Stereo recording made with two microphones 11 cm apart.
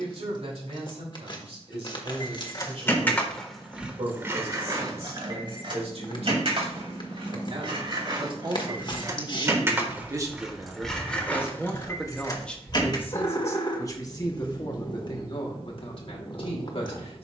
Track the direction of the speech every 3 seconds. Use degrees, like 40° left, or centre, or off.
70° right, 70° right, 50° right, 20° right, 20° left, 50° left.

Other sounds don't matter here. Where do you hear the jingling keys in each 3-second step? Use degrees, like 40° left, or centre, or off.
30° left, 20° right, 50° right, centre, 40° left, off.